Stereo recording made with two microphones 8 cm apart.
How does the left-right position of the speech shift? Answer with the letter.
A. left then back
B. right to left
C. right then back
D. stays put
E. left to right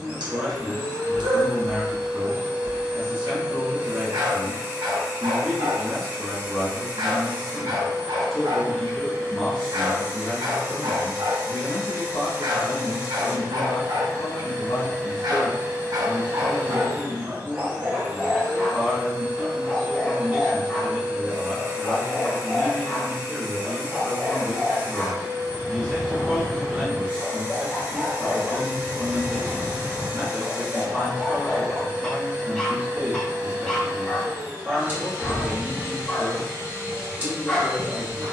A.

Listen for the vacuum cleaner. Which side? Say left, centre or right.
right.